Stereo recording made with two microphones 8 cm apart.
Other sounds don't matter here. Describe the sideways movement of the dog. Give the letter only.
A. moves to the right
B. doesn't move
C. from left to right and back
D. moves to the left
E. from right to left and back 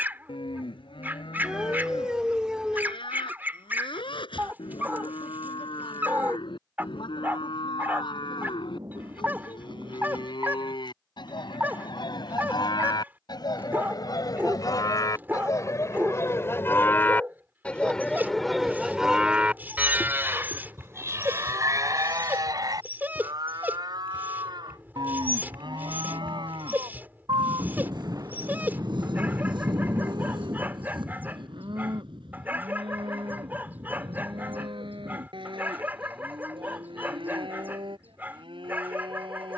B.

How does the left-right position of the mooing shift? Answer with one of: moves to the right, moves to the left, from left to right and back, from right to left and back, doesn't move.
moves to the right.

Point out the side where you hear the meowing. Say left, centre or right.
centre.